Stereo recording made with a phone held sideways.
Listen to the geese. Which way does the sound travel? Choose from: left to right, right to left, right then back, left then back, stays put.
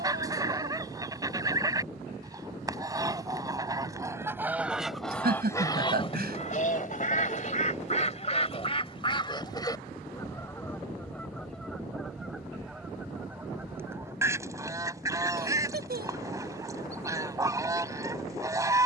left then back.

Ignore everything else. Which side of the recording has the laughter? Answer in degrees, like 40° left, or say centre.
70° right.